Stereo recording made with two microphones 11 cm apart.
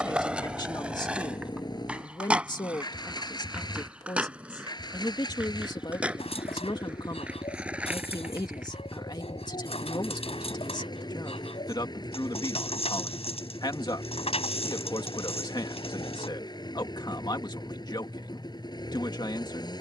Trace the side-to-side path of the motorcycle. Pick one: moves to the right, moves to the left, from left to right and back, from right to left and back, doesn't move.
doesn't move.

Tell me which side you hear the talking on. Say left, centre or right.
left.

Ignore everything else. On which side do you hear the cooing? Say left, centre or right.
left.